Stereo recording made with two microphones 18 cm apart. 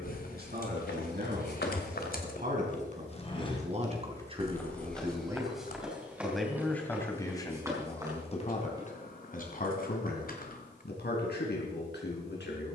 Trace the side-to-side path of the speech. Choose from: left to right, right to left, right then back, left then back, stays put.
right to left.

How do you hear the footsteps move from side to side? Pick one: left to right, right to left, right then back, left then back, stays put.
left to right.